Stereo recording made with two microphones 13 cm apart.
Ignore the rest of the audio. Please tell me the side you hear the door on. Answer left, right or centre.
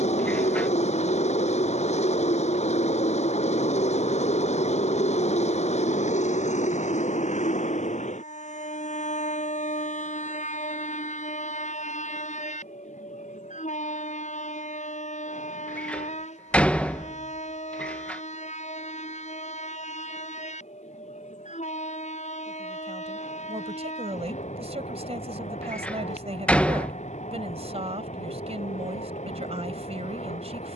centre.